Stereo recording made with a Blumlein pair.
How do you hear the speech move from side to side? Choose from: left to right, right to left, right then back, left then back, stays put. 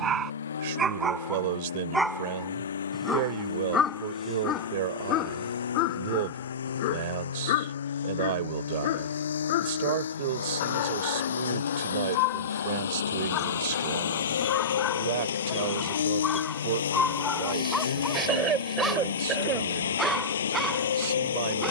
stays put.